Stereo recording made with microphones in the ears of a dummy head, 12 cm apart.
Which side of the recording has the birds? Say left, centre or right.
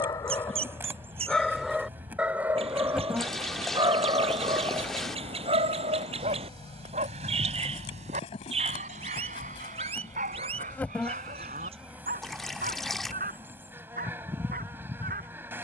right.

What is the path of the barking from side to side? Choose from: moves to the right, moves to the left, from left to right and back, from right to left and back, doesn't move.
moves to the right.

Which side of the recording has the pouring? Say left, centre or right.
centre.